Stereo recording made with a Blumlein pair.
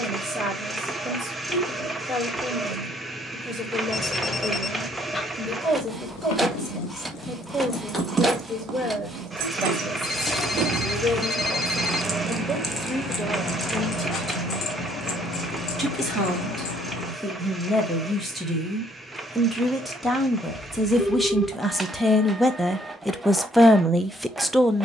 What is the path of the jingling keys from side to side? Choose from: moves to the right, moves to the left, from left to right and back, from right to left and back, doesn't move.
from left to right and back.